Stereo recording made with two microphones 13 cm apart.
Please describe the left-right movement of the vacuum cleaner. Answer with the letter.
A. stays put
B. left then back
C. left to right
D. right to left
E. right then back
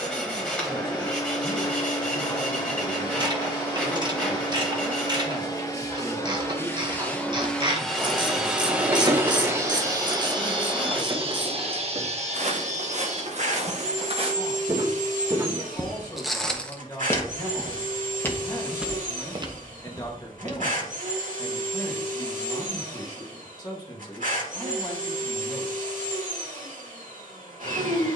C.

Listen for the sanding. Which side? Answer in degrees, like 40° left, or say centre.
10° left.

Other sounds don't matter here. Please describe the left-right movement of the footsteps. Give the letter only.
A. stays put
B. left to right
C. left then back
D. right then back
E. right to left
C.